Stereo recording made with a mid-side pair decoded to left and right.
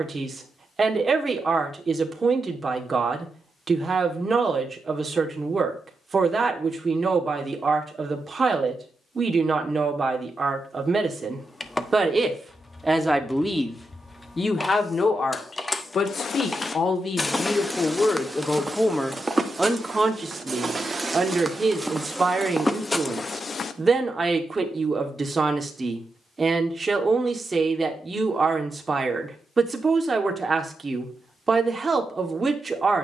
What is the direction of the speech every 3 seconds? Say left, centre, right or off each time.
right, right, right, right, centre, left, centre, right, right, right, right.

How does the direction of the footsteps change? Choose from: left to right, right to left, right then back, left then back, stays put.
right then back.